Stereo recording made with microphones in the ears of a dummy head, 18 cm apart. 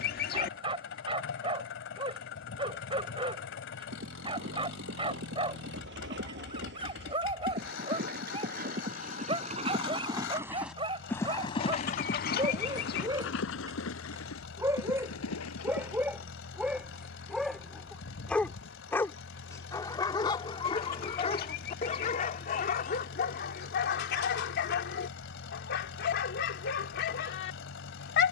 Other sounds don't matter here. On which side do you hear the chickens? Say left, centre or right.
left.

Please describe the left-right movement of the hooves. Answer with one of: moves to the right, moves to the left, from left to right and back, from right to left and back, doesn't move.
moves to the left.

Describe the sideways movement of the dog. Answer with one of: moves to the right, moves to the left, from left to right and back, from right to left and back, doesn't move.
moves to the left.